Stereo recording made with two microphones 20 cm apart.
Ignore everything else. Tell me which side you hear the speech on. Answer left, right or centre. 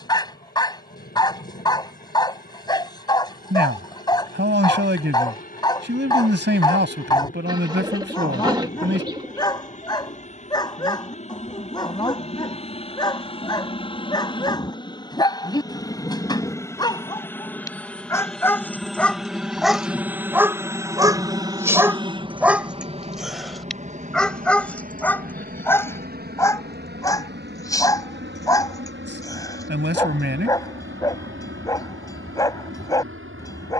right.